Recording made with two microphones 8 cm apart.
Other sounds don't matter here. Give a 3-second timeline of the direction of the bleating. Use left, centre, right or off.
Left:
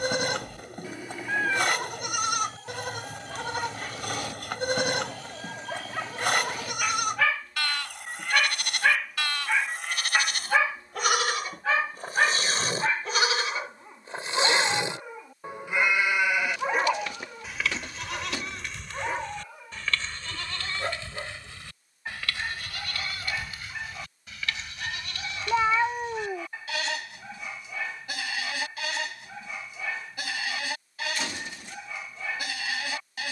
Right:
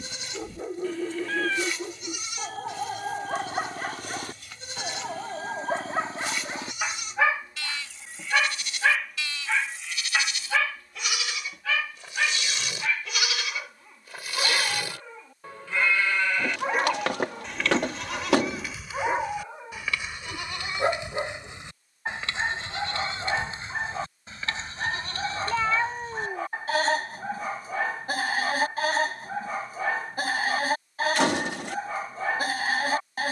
left, left, left, left, left, centre, centre, right, right, right, right.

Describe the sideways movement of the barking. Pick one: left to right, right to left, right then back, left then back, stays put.
left then back.